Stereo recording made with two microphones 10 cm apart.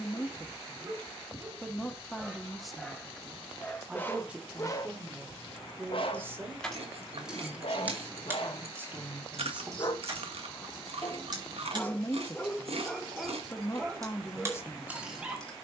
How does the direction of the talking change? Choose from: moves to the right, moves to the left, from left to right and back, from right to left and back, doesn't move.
from left to right and back.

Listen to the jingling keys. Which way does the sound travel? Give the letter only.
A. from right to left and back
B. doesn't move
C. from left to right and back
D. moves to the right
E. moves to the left
C.